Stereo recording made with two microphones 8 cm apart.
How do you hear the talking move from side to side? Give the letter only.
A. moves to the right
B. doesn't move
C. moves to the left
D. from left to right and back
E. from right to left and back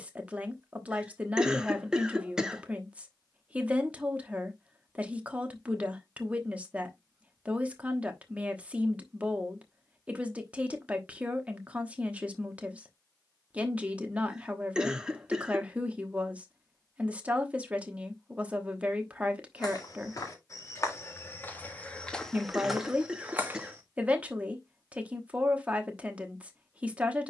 B.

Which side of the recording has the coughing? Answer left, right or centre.
centre.